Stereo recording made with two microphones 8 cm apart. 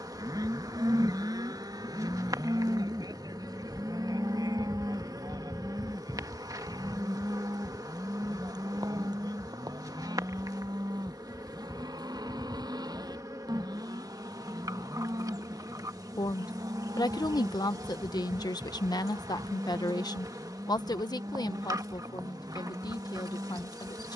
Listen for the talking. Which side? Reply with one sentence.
You can hear the talking on the left.